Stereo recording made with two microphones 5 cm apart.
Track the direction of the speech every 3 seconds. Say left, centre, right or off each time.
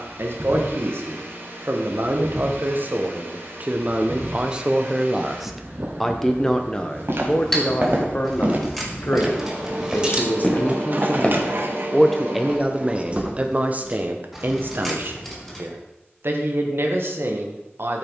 right, right, left, left, right, right.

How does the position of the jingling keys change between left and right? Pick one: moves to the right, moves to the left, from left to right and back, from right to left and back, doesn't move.
from left to right and back.